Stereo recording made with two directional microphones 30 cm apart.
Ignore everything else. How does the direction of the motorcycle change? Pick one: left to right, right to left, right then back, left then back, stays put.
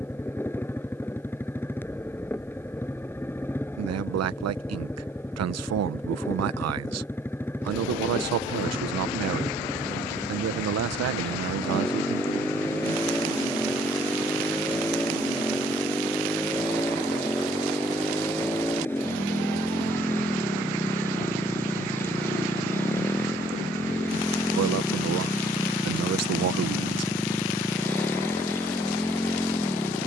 stays put.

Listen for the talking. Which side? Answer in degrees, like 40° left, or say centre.
60° right.